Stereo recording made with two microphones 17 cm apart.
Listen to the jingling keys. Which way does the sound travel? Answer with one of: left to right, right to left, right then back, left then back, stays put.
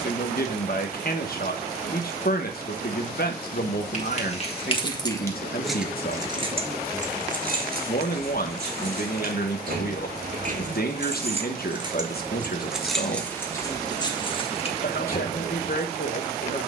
right then back.